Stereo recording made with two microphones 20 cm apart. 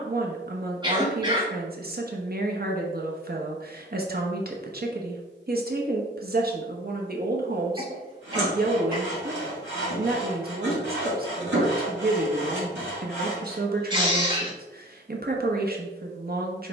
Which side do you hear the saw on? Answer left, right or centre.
right.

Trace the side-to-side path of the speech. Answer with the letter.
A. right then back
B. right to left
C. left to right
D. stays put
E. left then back
D.